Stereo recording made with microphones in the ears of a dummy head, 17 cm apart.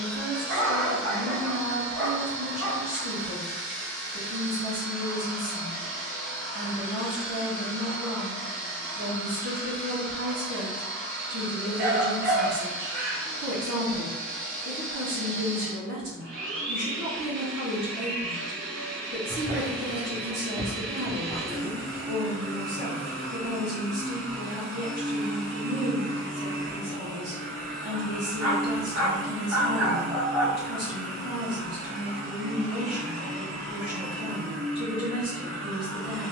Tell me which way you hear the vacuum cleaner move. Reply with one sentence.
In this clip you hear the vacuum cleaner stay in one place.